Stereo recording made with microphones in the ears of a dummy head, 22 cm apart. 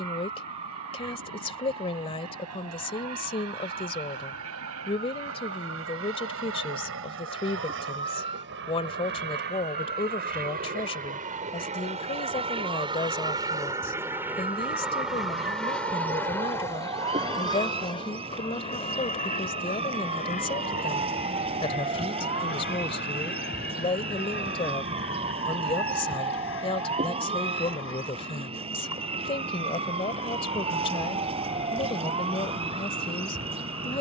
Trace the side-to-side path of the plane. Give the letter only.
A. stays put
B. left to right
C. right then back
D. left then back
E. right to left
E.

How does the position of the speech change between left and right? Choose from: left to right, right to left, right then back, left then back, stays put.
stays put.